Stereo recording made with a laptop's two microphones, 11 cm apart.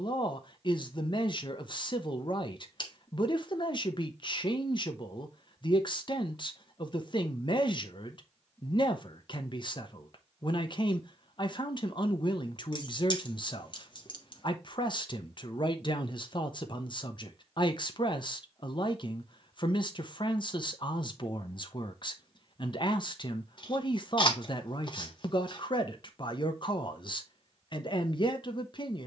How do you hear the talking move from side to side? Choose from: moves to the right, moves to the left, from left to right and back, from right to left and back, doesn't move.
doesn't move.